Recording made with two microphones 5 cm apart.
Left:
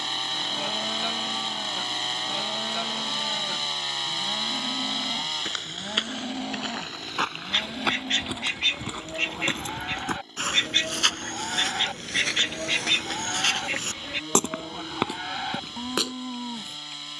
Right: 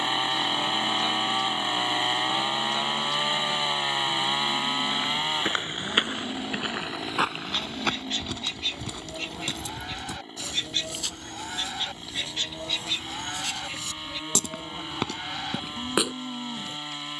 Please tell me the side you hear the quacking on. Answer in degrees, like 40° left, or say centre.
60° left.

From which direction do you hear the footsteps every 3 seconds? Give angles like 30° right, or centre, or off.
off, 30° right, centre, 60° left, 60° left, 10° right.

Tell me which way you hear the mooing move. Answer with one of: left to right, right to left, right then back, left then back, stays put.
stays put.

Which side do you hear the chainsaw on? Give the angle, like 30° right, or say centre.
20° right.